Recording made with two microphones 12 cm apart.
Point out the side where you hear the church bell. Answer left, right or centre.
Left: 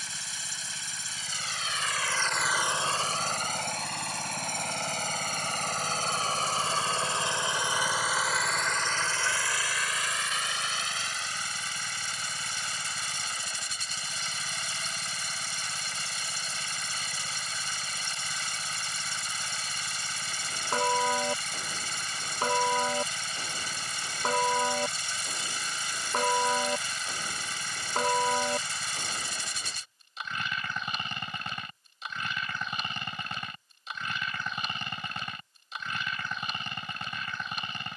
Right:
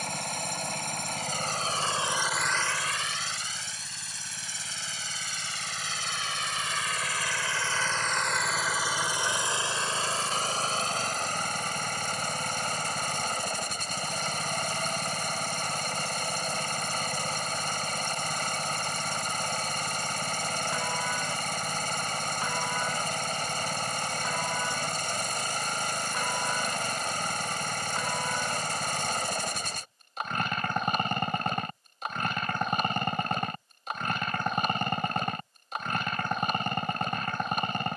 left.